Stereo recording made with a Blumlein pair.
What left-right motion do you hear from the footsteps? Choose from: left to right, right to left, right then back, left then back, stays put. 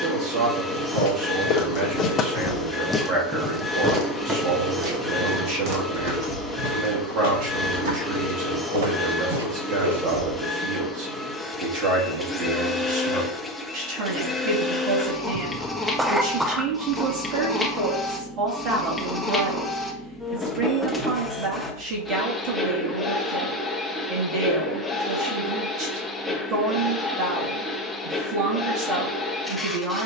left to right.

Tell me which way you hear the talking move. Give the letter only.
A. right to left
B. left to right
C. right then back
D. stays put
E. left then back
D.